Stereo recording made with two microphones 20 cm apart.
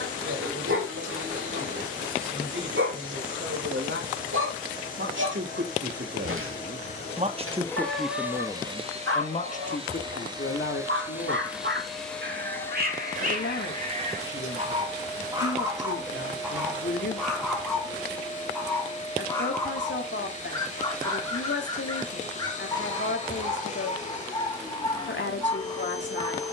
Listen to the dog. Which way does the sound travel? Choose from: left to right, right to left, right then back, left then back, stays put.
right to left.